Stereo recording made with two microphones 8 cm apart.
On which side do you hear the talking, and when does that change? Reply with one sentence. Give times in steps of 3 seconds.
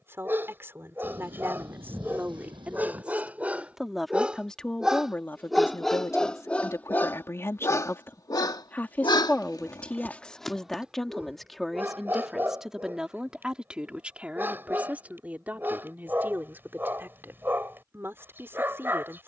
You can hear the talking on the right from 0 s, in the centre from 3 s, on the left from 6 s, in the centre from 9 s and on the right from 15 s.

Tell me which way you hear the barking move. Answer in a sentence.
You can hear the barking go left and come back.